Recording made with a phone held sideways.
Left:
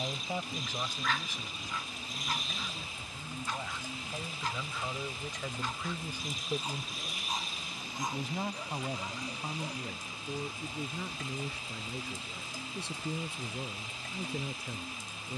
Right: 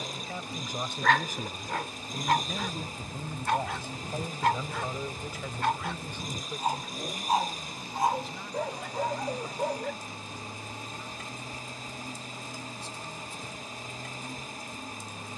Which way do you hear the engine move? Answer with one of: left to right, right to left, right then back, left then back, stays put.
stays put.